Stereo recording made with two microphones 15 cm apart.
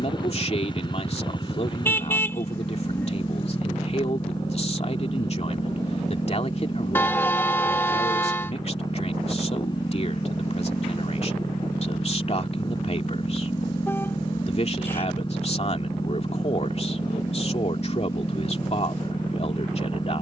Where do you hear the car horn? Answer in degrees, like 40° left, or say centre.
10° left.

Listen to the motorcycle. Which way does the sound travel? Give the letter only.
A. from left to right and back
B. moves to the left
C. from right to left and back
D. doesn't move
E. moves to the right
D.